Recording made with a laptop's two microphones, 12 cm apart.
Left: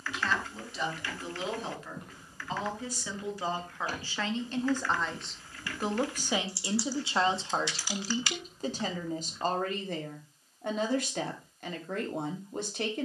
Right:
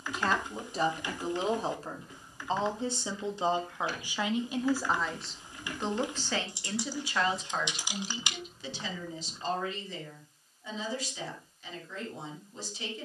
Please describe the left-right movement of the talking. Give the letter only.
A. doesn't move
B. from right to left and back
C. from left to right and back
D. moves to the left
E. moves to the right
D.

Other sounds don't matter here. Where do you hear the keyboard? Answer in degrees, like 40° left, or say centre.
20° right.